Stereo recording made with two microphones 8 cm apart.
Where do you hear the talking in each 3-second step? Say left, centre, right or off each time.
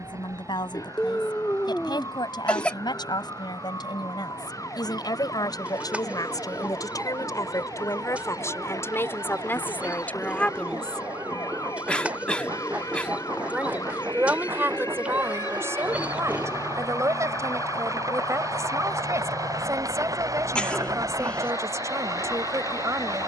left, left, left, left, right, right, right, right.